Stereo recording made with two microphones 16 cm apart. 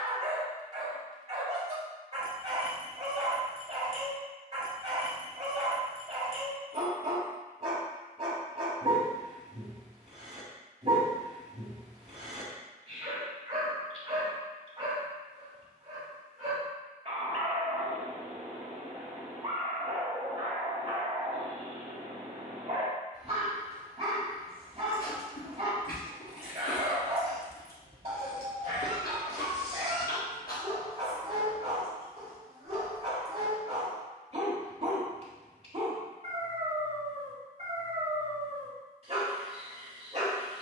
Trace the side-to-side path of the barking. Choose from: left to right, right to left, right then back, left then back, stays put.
stays put.